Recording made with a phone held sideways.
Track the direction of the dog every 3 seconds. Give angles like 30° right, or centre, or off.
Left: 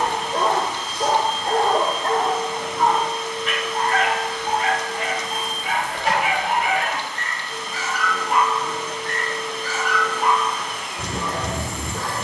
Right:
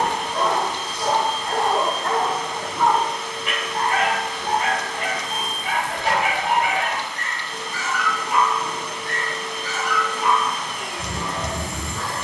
40° left, 20° right, 10° left, 50° left.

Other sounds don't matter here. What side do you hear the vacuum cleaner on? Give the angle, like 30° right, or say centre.
80° right.